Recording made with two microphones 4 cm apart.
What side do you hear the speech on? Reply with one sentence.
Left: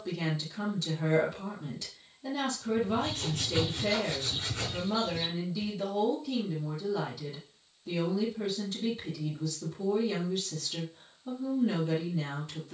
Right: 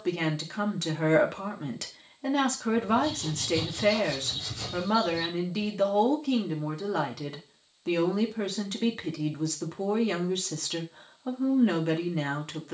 In this clip you hear the speech on the right.